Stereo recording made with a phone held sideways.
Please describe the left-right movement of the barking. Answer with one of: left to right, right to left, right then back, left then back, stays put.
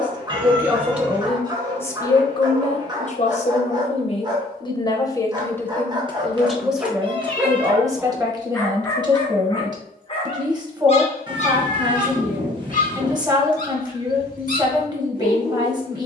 right to left.